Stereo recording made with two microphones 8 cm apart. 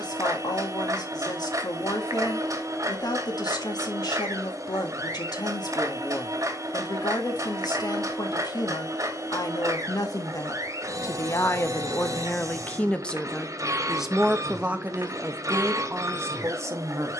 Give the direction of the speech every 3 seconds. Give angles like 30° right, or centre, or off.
60° left, 60° left, 60° left, 50° left, centre, 40° right.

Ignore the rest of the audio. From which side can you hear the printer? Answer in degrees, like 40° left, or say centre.
50° right.